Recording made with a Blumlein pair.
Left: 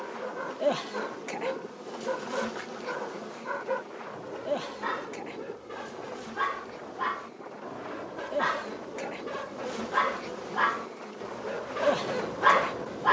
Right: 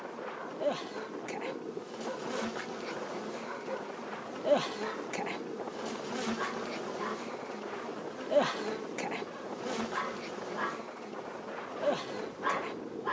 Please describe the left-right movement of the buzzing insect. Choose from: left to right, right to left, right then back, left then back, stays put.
right then back.